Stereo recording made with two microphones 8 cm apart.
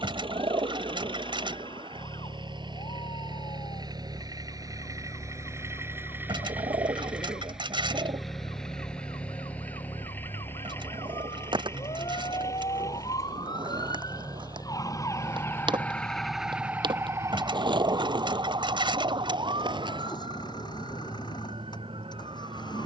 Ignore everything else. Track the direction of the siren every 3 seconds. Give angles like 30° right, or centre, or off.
80° left, 80° left, 80° left, 70° left, 60° left, 10° right, 60° right, 70° right.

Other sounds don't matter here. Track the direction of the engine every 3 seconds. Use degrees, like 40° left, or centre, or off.
70° right, 40° right, 10° right, 20° left, 40° left, 50° left, 50° left, 60° left.